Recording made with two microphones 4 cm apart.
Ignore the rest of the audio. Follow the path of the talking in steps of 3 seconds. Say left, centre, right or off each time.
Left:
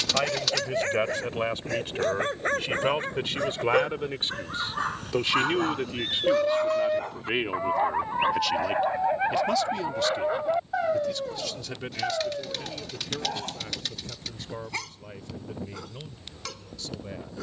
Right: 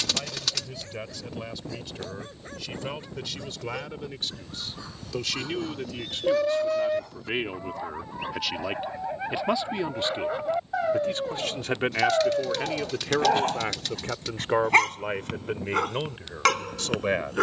left, left, centre, right, right, right.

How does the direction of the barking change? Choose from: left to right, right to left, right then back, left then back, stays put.
left to right.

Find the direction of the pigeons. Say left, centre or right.
centre.